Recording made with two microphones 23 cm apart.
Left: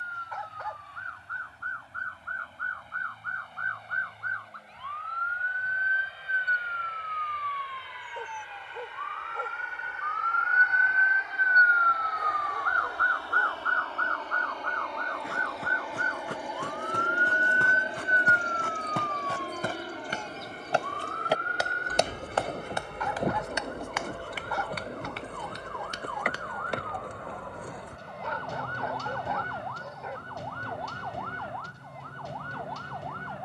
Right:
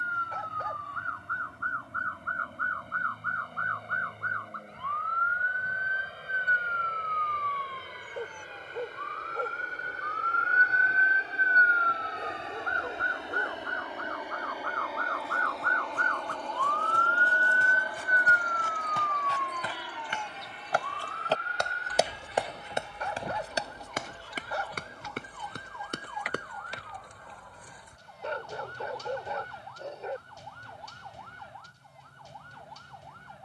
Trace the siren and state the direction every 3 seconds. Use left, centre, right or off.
right, right, right, right, centre, centre, left, left, left, left, left.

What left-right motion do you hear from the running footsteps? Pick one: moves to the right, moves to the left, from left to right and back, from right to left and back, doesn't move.
moves to the right.